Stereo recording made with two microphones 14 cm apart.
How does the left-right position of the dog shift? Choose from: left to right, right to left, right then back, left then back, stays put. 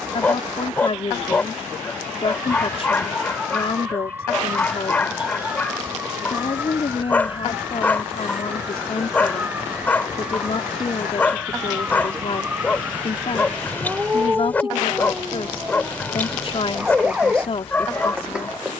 stays put.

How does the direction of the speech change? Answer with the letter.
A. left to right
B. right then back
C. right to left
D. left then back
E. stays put
E.